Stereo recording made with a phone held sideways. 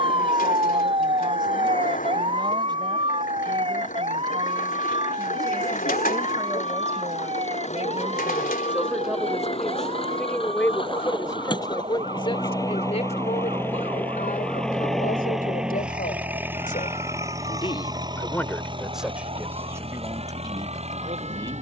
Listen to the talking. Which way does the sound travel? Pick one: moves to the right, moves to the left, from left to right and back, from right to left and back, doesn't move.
from right to left and back.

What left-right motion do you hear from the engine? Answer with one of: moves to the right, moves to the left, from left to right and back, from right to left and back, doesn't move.
moves to the right.